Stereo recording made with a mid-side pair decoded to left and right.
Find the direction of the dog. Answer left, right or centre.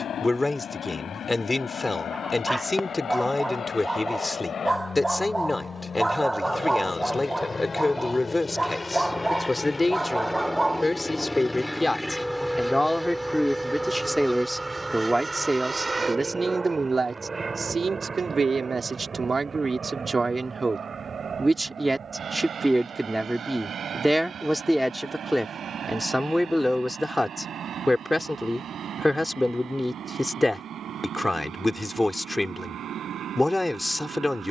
centre.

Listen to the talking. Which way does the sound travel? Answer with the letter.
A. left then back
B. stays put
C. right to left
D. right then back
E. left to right
D.